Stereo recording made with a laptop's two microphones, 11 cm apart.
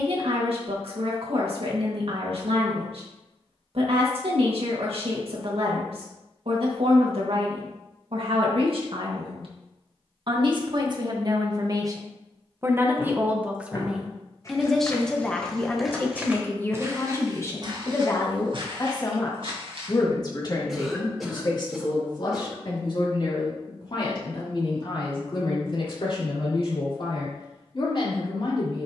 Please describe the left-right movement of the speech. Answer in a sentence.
You can hear the speech move to the left.